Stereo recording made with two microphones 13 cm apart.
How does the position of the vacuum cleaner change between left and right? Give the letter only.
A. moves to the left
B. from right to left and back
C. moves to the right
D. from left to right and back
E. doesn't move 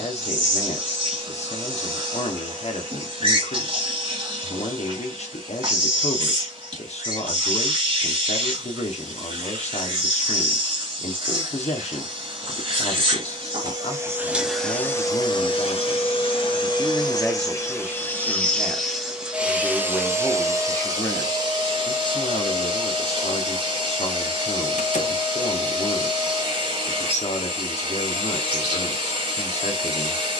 B.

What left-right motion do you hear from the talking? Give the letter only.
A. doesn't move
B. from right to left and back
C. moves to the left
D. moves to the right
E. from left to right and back
E.